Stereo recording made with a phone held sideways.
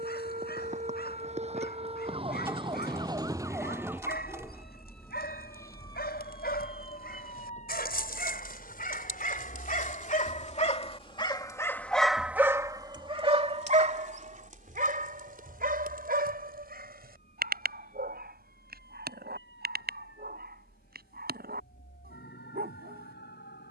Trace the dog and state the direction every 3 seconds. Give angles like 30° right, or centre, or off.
80° left, 80° left, 70° left, 40° left, 40° right, 70° right, 80° right, 80° right.